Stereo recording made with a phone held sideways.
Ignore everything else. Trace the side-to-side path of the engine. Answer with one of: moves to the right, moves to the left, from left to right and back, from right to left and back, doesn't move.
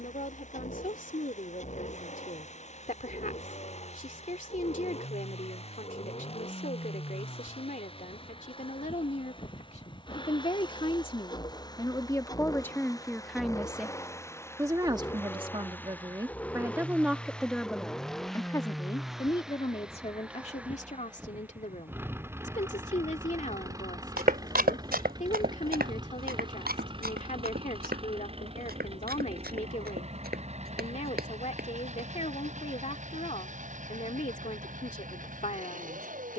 moves to the right.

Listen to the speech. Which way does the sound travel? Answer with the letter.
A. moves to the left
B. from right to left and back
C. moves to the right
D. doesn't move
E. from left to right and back
E.